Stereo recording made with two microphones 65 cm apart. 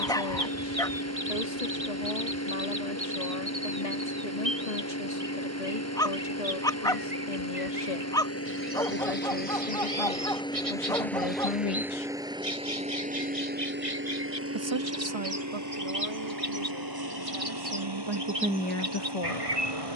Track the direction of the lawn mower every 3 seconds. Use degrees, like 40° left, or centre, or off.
20° left, 20° left, 20° left, 10° left, 10° right, 30° right, 40° right.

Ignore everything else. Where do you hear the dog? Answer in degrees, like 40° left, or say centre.
10° left.